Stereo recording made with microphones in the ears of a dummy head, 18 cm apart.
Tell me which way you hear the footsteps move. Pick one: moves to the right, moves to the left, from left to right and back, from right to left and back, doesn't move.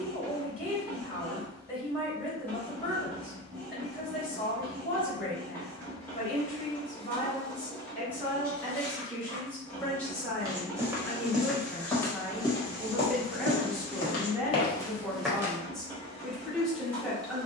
from right to left and back.